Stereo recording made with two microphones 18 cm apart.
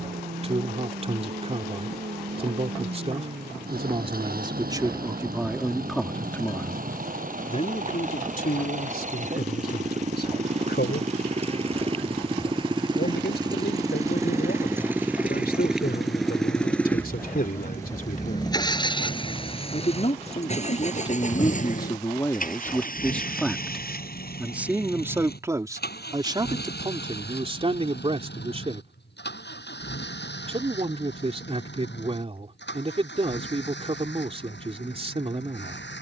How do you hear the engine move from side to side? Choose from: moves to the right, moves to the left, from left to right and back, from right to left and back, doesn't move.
moves to the left.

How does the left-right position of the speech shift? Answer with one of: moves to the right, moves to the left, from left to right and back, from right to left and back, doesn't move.
from right to left and back.